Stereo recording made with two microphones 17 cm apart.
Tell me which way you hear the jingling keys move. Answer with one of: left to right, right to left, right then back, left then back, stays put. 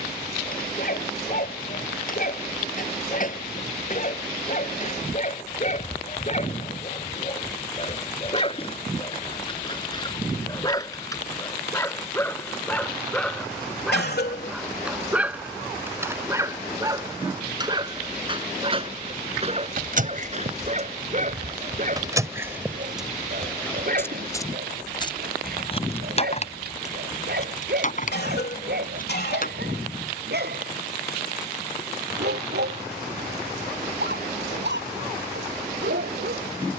right to left.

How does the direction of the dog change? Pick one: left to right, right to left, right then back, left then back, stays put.
left to right.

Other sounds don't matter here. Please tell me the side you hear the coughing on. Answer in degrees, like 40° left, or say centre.
70° left.